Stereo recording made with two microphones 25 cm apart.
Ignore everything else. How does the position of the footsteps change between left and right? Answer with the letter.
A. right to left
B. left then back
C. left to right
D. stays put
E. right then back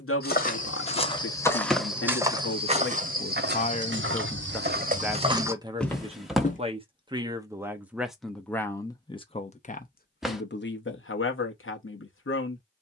E.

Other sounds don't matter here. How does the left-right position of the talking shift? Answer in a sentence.
In this clip you hear the talking go right and come back.